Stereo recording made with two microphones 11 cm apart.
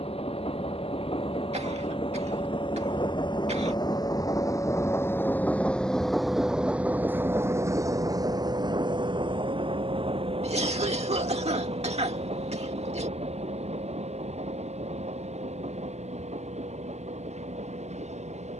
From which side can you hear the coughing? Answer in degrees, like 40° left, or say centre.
70° right.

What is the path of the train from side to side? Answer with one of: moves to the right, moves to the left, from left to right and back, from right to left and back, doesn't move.
moves to the right.